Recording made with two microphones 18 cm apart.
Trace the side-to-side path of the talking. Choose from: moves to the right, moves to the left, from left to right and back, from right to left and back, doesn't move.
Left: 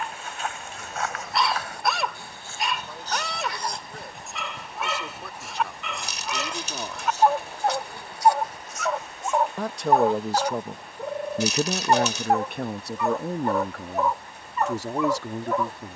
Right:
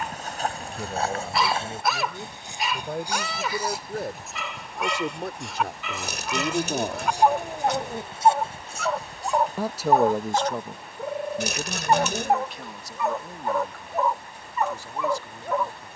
moves to the left.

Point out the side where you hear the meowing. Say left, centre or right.
right.